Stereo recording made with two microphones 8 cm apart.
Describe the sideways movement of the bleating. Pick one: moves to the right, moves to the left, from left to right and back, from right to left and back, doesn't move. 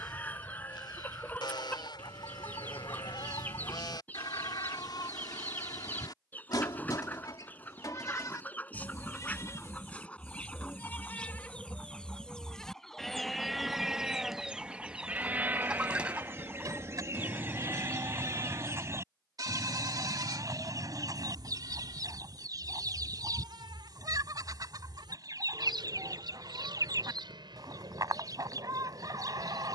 moves to the right.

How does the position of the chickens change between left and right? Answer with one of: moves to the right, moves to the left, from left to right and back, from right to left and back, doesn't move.
moves to the right.